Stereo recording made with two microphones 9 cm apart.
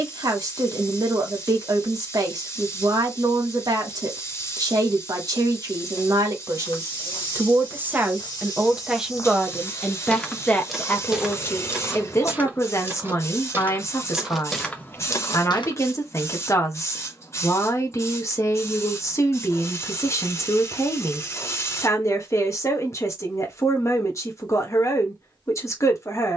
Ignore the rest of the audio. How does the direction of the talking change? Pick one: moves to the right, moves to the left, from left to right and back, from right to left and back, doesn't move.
moves to the left.